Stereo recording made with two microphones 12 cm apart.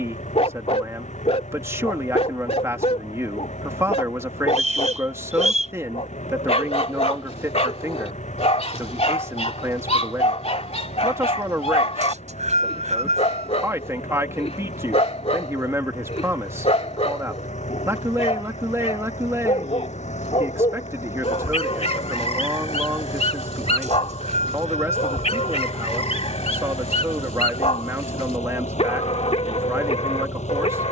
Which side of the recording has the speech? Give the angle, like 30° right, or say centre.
20° right.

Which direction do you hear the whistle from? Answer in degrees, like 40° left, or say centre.
70° right.